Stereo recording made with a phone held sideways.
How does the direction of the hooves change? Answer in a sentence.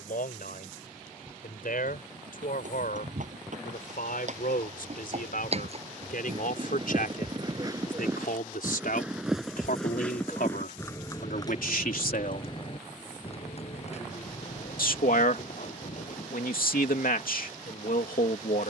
In this clip you hear the hooves go from the right side to the left.